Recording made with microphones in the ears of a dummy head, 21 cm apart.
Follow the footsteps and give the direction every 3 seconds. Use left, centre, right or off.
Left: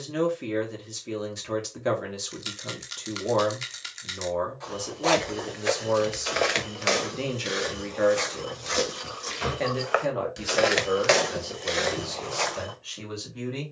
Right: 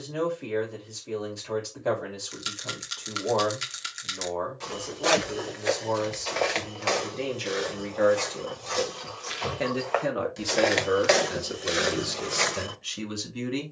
off, centre, left, centre, right.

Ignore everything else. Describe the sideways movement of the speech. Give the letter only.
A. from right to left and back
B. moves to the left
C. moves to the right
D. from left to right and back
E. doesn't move
C.